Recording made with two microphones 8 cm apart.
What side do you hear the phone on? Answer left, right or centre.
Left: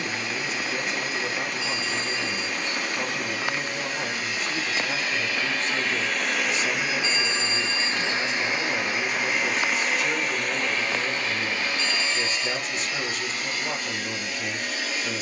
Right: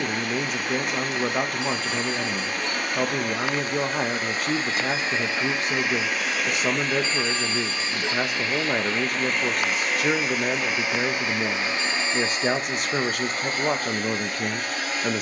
right.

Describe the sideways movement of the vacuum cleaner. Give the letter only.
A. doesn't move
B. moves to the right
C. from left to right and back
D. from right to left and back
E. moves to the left
D.